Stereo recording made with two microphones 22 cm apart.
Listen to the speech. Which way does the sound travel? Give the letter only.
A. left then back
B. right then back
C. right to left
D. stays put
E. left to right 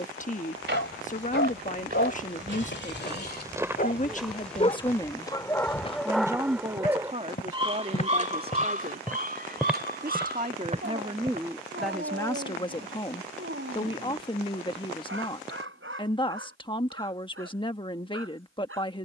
B.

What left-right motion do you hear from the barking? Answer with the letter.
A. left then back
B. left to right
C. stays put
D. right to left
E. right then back
B.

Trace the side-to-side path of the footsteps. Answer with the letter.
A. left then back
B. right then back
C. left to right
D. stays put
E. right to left
A.